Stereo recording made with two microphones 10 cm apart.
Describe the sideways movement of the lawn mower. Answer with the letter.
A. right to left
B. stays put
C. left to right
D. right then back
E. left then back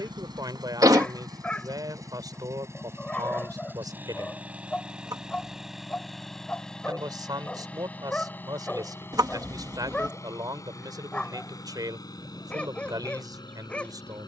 A.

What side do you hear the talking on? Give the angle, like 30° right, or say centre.
40° right.